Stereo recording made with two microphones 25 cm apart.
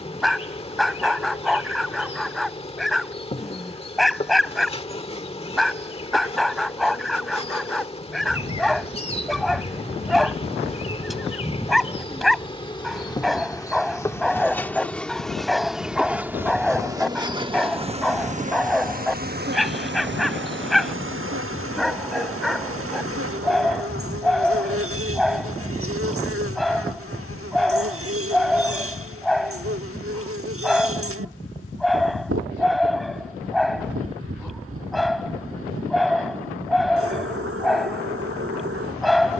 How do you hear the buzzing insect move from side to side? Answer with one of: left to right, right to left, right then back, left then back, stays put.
left to right.